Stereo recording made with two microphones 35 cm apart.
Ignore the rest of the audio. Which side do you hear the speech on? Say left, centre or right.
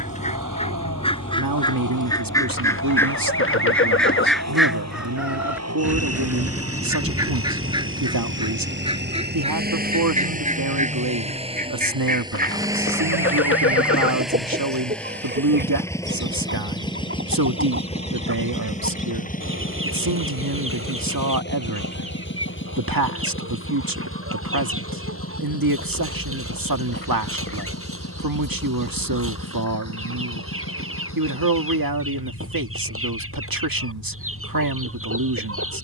right.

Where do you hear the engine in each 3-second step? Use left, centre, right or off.
right, right, right, right, centre, centre, left, left, left, left, left, left.